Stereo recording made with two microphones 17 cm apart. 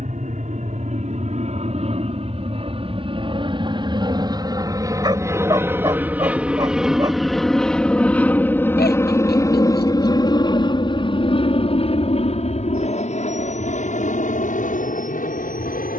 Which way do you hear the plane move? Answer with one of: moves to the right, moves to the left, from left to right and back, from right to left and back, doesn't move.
moves to the left.